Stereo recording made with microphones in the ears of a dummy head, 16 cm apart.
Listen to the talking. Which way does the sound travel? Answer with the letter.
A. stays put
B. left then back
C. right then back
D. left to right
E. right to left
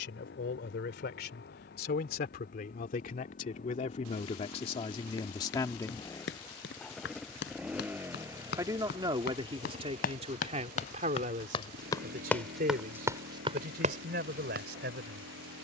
D.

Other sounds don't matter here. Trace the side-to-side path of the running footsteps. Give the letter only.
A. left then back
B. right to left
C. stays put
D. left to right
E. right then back
D.